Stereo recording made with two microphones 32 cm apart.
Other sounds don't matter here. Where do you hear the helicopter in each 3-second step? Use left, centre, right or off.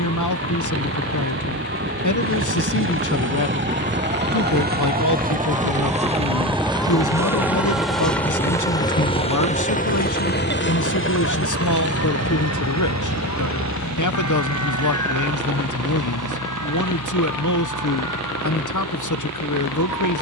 right, right, centre, left, left, left, left.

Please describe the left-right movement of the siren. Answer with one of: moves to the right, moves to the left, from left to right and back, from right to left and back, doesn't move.
moves to the left.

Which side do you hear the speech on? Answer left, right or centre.
left.